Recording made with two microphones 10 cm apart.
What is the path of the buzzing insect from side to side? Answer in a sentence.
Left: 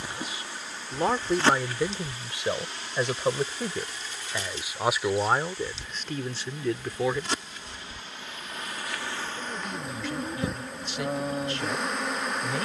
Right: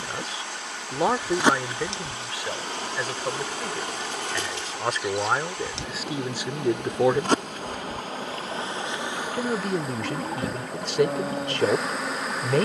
In this clip you hear the buzzing insect go right and come back.